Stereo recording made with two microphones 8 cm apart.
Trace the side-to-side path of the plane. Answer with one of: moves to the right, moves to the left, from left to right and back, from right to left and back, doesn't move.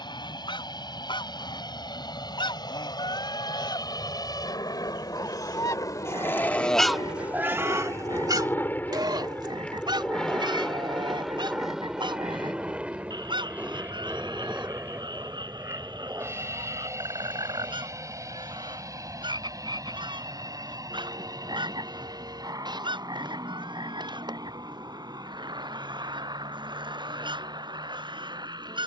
moves to the right.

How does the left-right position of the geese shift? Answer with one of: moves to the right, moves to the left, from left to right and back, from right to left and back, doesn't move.
moves to the right.